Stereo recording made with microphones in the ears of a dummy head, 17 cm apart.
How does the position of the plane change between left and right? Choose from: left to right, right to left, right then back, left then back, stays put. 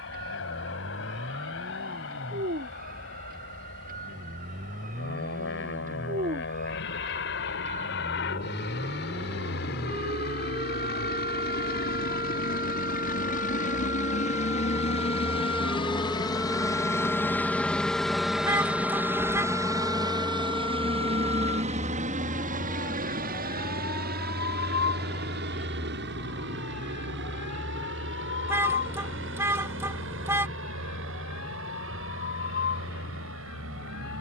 left to right.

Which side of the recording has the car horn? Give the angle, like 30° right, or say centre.
10° right.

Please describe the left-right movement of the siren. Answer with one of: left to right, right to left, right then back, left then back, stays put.
right to left.